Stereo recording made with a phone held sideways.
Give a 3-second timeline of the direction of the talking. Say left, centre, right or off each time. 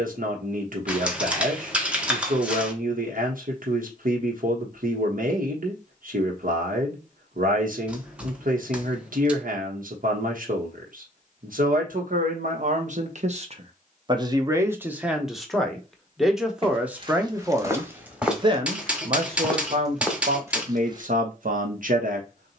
right, right, right, right, right, centre, right, right.